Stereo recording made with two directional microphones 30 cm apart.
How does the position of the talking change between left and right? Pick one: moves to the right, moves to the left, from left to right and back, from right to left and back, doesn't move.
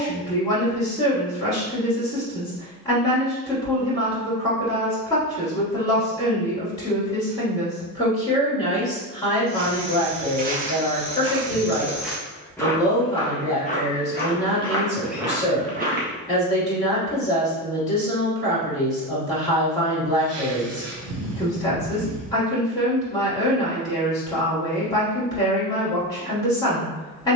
doesn't move.